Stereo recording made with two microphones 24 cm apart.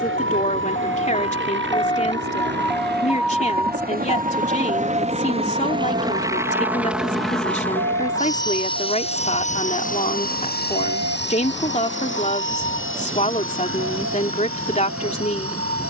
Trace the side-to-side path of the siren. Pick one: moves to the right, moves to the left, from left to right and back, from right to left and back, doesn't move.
moves to the right.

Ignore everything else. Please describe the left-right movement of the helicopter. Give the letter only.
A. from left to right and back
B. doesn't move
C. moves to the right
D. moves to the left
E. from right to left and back
D.